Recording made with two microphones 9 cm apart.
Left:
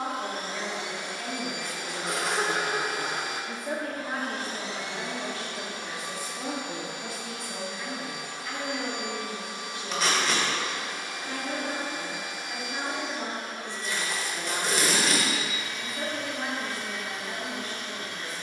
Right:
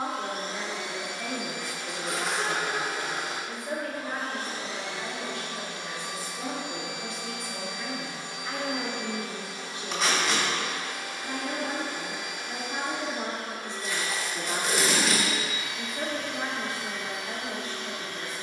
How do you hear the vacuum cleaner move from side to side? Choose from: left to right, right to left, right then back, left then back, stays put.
left to right.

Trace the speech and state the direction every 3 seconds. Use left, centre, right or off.
centre, left, centre, right, right, right.